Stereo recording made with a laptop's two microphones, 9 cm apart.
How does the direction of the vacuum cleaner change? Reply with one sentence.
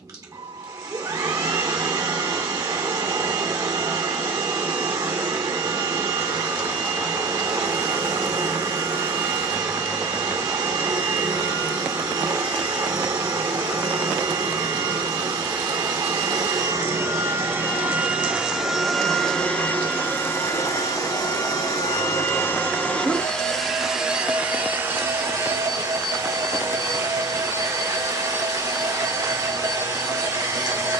You can hear the vacuum cleaner move from right to left and back again.